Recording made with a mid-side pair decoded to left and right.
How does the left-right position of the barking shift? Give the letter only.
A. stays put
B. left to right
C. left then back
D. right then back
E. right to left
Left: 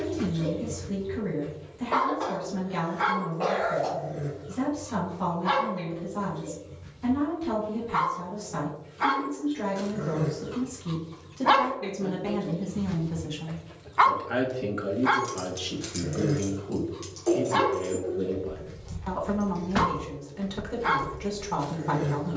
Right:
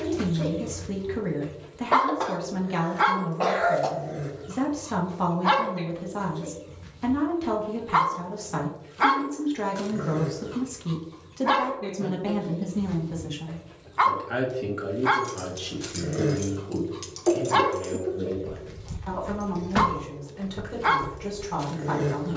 C.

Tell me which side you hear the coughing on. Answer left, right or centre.
right.